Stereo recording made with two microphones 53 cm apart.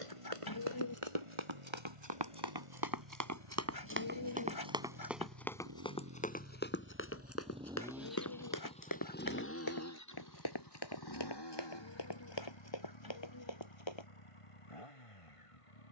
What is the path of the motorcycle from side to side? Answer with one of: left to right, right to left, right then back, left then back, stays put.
right to left.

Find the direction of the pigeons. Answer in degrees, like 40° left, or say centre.
40° left.